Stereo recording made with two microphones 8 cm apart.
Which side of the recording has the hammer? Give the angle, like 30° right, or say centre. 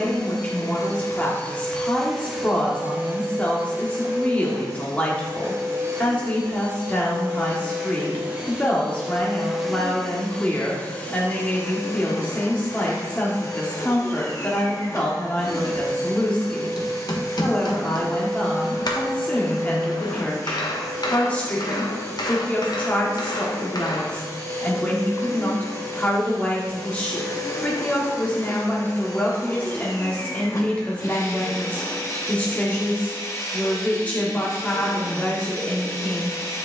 60° left.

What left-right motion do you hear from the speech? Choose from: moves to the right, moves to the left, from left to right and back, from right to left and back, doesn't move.
doesn't move.